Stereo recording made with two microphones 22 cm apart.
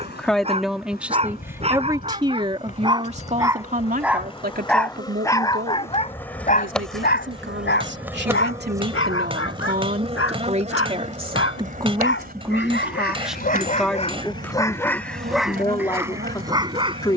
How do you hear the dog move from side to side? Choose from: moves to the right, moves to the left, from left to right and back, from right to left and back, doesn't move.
from right to left and back.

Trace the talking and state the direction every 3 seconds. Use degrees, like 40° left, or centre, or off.
10° right, 40° right, 50° right, 30° right, centre, 20° left.